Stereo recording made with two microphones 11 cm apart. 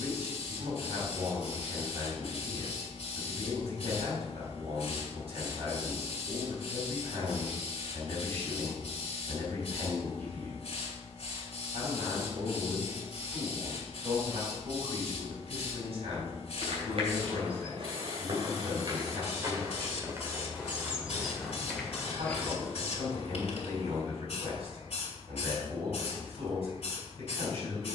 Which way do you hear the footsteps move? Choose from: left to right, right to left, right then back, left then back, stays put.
right to left.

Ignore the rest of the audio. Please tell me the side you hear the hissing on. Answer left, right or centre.
left.